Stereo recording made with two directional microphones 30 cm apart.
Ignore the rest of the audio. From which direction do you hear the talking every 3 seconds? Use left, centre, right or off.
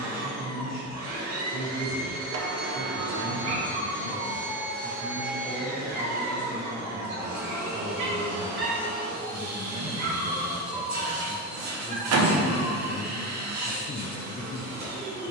right, right, right, centre, left.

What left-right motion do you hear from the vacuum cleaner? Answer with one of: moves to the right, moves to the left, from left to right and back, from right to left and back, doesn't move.
doesn't move.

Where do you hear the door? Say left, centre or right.
right.